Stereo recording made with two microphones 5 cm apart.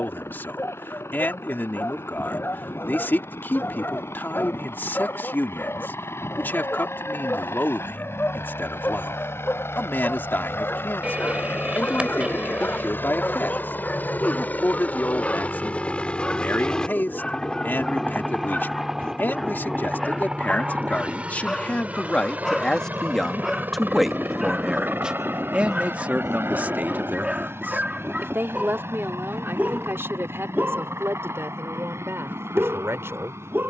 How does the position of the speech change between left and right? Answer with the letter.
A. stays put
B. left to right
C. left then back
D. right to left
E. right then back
B.